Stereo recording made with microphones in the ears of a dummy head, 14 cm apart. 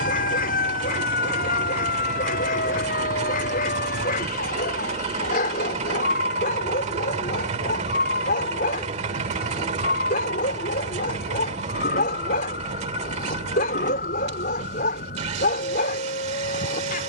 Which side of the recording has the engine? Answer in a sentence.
In this clip you hear the engine on the right.